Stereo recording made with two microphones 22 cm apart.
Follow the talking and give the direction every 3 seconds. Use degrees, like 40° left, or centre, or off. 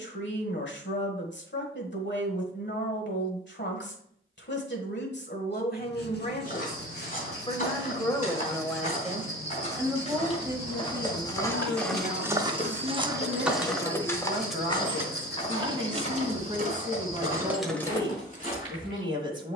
60° left, 50° left, 20° left, 10° right, 20° right, 20° right, 20° right.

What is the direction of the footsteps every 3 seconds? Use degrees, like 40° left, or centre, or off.
off, off, 40° left, 20° left, centre, 30° left, 40° left.